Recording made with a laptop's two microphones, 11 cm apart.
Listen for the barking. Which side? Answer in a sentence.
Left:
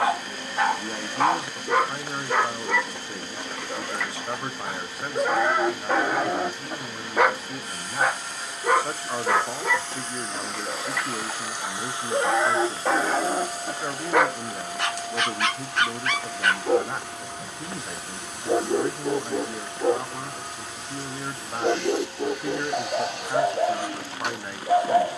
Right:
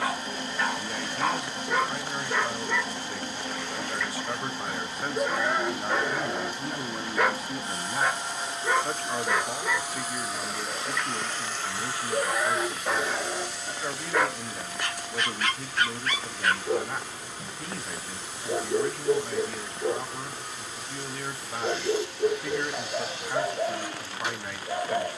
In this clip you hear the barking on the left.